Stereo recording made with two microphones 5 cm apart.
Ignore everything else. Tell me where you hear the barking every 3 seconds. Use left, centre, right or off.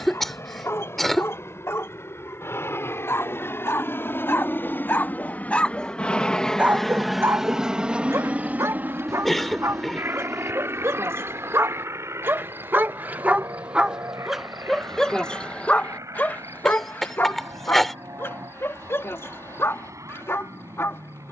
left, left, right, right, right, left, left.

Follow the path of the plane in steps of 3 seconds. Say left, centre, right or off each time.
left, left, centre, right, right, right, right.